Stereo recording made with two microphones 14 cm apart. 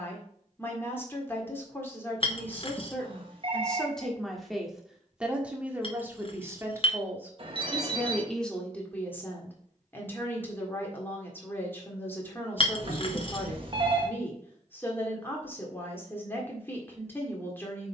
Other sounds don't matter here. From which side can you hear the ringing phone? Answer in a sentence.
You can hear the ringing phone on the right.